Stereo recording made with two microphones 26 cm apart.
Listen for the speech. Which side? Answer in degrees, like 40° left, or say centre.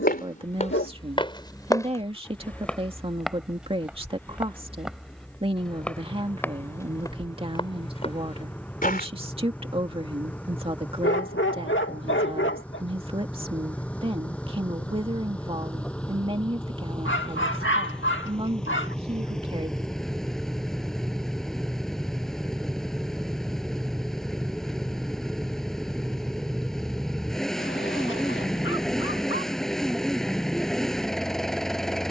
20° right.